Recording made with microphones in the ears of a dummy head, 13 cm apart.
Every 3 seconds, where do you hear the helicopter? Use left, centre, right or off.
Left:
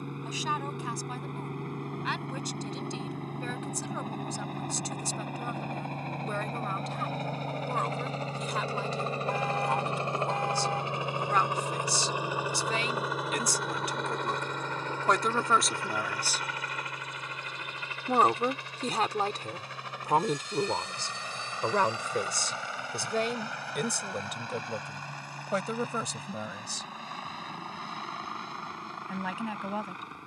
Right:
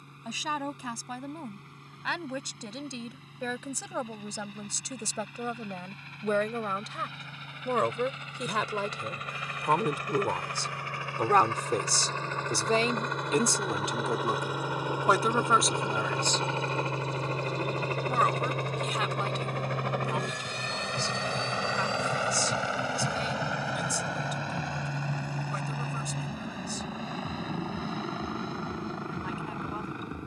left, left, left, left, centre, right, right, right, right, right.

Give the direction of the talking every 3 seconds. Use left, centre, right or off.
right, right, right, right, right, centre, left, left, left, left.